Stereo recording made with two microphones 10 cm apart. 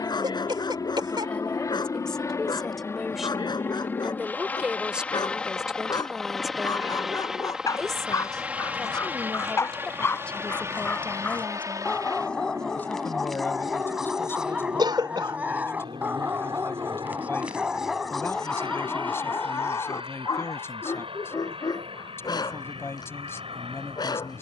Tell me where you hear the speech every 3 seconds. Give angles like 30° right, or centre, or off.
10° left, 10° right, centre, 10° left, 20° left, 20° left, 20° left, 20° left.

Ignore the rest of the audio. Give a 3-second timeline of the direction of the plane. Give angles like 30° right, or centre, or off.
40° left, 20° left, 10° right, 30° right, 40° right, 50° right, 60° right, 60° right.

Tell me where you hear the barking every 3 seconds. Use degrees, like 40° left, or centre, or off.
50° left, 50° left, 40° left, 20° left, centre, 20° right, 20° left, 50° left.